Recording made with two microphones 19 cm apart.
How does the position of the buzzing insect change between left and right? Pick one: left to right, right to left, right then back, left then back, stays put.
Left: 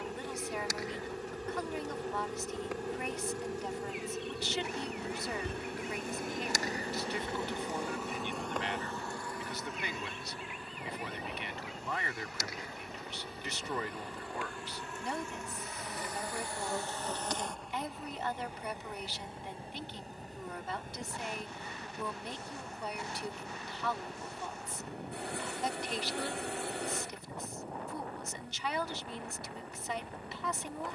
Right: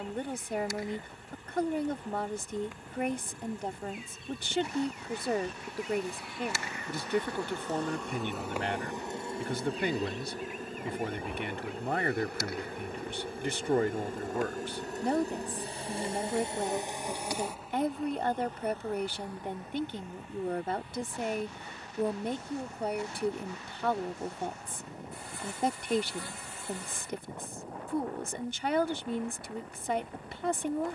right then back.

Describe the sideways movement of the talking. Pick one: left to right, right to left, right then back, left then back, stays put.
stays put.